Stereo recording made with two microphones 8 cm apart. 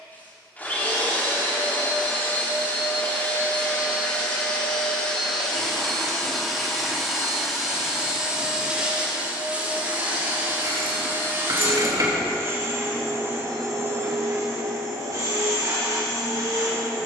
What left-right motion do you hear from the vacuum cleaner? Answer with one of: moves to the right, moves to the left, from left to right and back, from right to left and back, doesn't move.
moves to the right.